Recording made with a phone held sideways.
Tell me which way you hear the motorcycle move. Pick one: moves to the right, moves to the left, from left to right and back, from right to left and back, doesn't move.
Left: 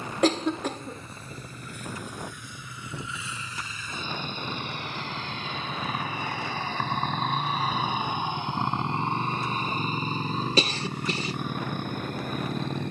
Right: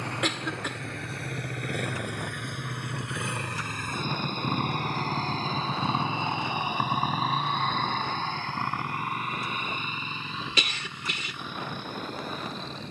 moves to the left.